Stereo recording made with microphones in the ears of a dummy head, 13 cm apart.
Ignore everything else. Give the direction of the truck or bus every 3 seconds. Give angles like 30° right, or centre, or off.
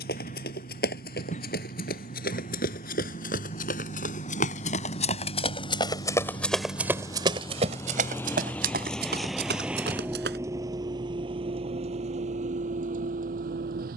50° left, 40° left, 20° left, 20° right, 60° right.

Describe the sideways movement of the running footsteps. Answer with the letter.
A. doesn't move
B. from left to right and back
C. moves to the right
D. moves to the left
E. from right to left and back
C.